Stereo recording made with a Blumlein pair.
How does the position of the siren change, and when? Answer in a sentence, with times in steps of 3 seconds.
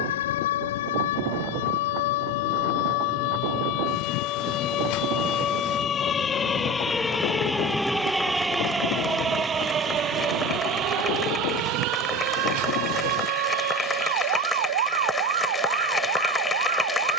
In this clip you hear the siren on the left from 0 s, in the centre from 6 s and on the right from 9 s.